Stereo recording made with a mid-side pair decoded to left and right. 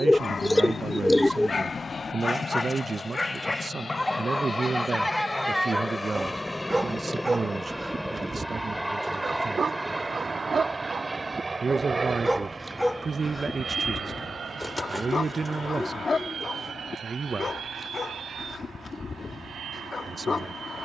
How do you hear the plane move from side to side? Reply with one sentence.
In this clip you hear the plane move to the right.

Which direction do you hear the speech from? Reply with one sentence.
In this clip you hear the speech on the right.